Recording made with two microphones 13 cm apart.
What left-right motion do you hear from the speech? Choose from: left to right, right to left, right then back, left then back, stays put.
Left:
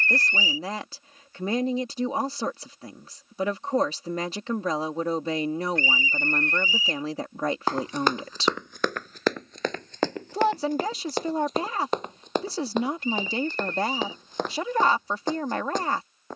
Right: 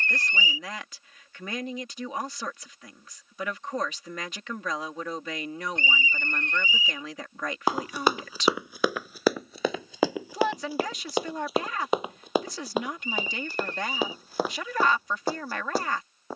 stays put.